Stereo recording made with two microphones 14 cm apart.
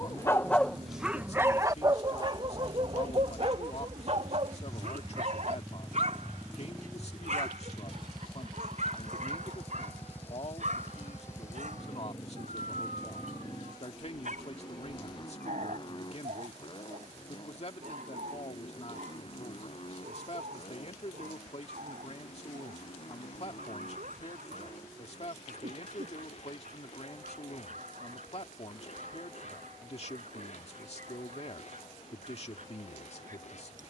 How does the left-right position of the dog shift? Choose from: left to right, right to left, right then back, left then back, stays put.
left to right.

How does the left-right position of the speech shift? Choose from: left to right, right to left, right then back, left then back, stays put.
stays put.